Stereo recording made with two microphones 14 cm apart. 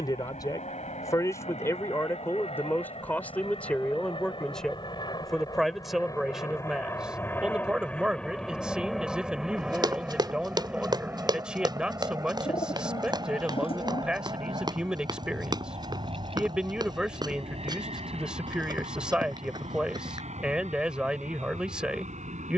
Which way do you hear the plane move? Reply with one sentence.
In this clip you hear the plane travel towards the right.